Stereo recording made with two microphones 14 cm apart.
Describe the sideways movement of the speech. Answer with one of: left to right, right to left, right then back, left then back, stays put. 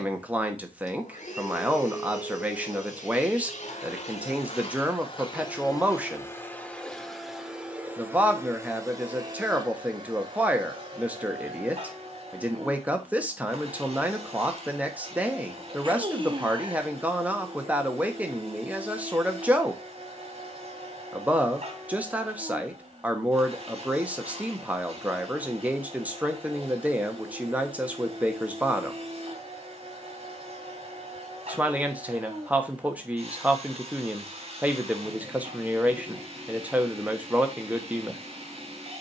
stays put.